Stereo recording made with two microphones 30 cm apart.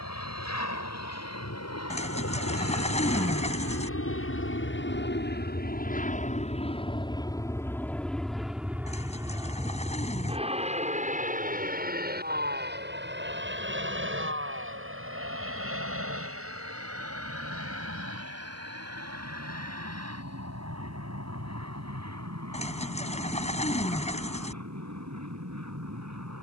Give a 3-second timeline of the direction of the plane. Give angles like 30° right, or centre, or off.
60° left, 40° left, 10° left, 20° right, 40° right, 50° right, 50° right, 60° right, 60° right.